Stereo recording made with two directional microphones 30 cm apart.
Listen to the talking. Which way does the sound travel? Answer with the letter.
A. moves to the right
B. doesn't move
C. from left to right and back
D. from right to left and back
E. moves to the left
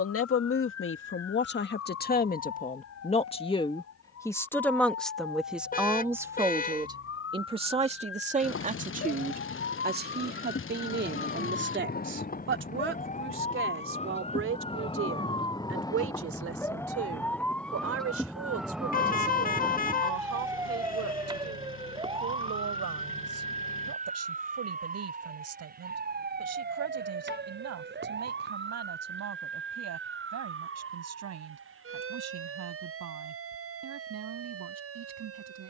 A.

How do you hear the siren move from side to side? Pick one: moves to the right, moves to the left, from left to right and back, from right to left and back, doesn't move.
moves to the right.